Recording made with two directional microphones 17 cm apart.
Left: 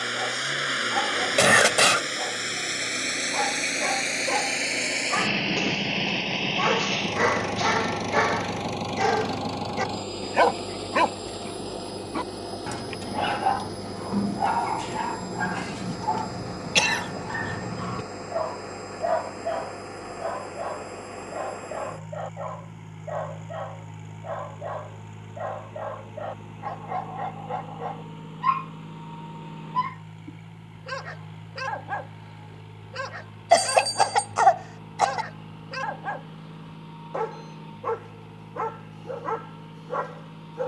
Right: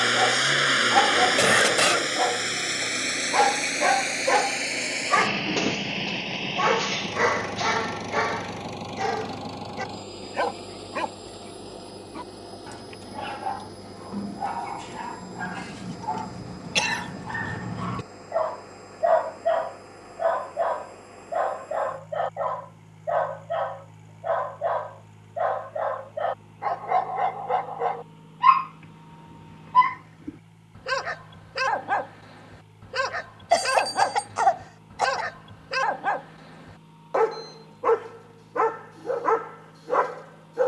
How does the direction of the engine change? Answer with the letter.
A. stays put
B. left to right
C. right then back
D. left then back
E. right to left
E.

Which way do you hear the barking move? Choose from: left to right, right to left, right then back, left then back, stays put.
left then back.